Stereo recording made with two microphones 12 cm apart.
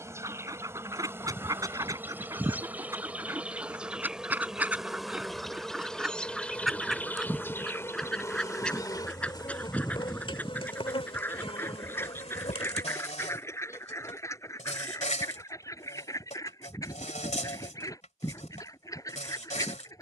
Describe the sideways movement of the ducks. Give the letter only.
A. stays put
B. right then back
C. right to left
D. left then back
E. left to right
C.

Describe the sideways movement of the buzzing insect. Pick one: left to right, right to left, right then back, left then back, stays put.
right to left.